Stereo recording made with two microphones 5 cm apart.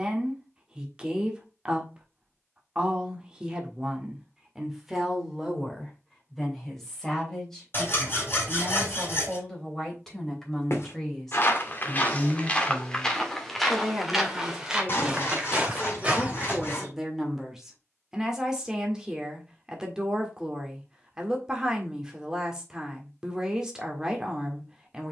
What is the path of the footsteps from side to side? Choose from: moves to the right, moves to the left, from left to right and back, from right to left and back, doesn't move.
moves to the right.